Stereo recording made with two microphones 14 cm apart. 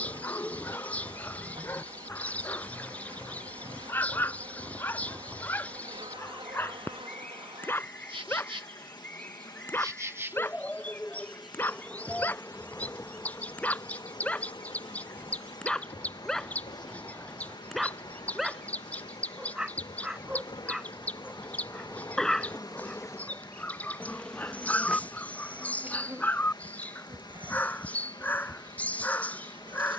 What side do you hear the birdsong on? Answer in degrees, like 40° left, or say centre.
10° left.